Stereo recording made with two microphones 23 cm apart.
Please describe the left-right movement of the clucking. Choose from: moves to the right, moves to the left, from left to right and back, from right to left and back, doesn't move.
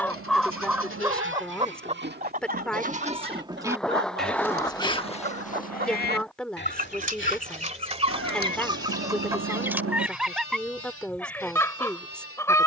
from left to right and back.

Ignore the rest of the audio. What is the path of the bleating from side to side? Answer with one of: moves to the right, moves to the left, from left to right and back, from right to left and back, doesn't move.
moves to the left.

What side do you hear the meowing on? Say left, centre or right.
right.